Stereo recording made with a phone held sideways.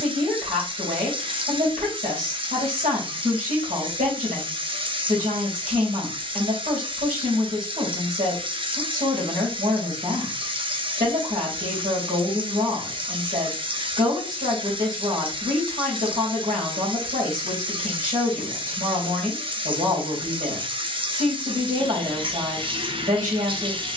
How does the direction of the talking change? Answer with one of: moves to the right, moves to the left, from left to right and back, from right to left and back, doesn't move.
doesn't move.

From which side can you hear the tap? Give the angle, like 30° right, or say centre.
40° right.